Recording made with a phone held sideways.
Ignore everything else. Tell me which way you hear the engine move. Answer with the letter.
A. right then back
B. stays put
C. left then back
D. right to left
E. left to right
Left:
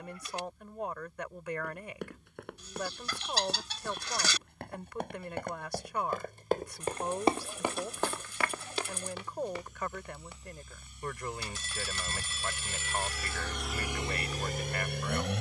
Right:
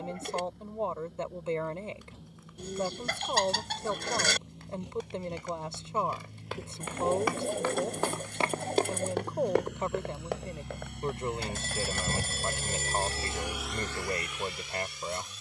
D.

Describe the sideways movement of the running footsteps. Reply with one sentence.
In this clip you hear the running footsteps move to the right.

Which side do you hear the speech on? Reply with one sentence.
In this clip you hear the speech on the right.